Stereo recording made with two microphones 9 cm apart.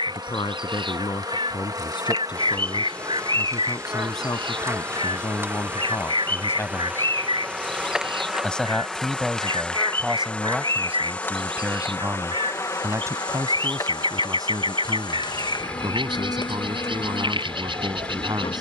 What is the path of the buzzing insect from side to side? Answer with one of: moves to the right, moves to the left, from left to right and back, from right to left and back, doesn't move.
moves to the left.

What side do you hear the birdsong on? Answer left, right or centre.
right.